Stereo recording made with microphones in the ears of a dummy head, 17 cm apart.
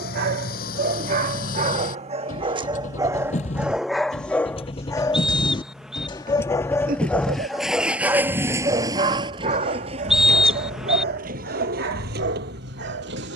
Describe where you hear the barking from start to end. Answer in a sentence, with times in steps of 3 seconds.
You can hear the barking on the right from 0 s, in the centre from 3 s and on the right from 9 s.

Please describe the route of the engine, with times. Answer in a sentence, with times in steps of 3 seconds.
You can hear the engine on the left from 0 s, in the centre from 6 s and on the right from 9 s.